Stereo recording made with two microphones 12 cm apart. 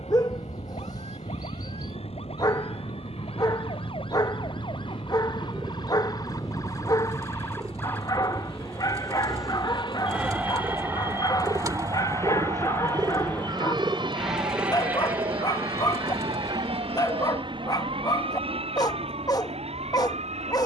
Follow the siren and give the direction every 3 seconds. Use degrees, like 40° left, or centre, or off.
60° left, 50° left, 20° left, 10° right, 40° right, 50° right, 60° right.